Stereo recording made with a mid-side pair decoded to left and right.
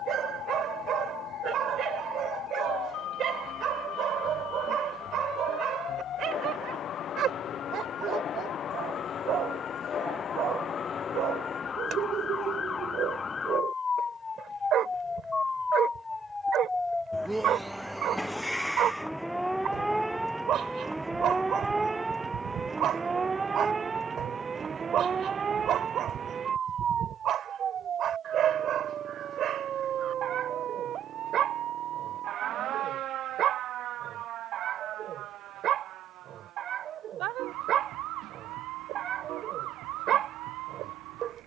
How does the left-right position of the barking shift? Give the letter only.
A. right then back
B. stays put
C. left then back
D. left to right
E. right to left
B.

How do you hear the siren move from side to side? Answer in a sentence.
You can hear the siren move from left to right.